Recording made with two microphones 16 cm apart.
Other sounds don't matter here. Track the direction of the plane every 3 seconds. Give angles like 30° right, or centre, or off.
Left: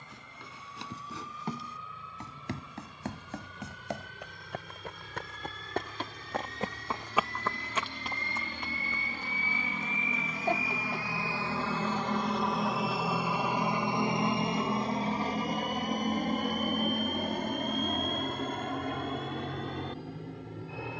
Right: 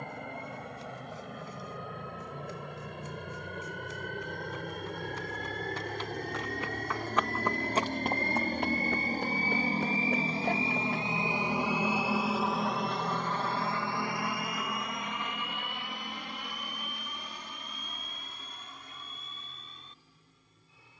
70° right, 70° right, 50° right, 30° right, 10° left, 40° left, 60° left.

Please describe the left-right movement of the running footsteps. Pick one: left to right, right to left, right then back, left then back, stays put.
left to right.